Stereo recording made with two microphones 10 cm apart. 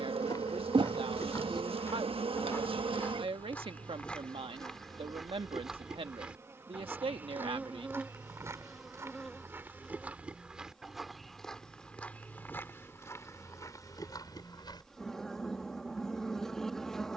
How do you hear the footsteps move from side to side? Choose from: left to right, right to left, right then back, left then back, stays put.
right then back.